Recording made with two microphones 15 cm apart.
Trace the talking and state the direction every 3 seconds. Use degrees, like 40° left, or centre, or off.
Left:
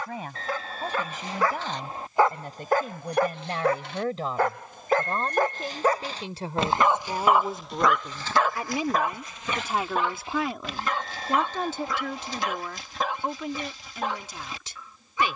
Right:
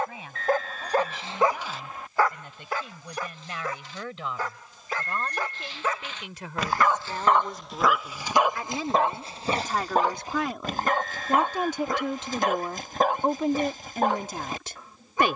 50° left, 40° left, 30° left, centre, 40° right.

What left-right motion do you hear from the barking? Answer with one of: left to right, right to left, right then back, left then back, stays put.
left then back.